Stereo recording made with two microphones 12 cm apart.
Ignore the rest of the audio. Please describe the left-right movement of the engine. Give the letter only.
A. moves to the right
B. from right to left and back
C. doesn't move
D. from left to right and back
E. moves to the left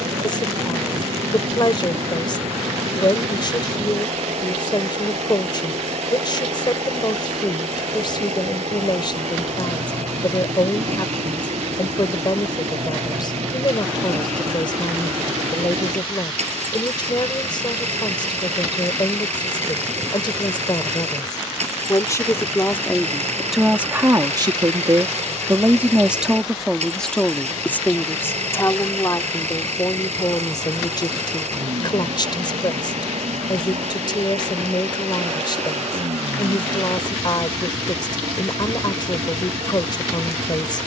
C.